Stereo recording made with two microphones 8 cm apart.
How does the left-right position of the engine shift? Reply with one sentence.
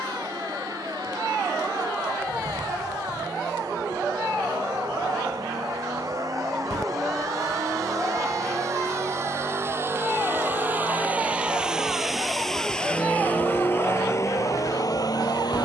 You can hear the engine move to the left.